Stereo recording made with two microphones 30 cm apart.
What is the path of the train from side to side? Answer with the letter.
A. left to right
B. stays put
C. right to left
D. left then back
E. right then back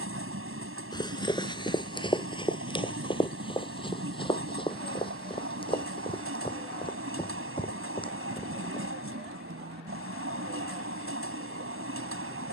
B.